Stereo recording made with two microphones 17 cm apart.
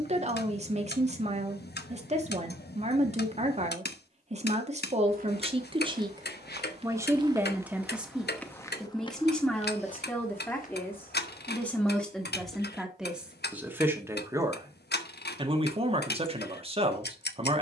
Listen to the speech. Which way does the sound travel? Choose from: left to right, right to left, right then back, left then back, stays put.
left then back.